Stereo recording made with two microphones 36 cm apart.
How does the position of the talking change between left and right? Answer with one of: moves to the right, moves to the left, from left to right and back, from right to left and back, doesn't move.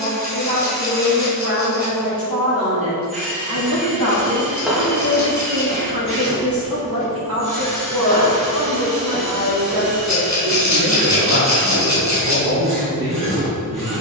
doesn't move.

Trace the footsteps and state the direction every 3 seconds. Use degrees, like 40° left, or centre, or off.
off, centre, 20° left, centre, off.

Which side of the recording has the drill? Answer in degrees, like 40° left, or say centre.
80° left.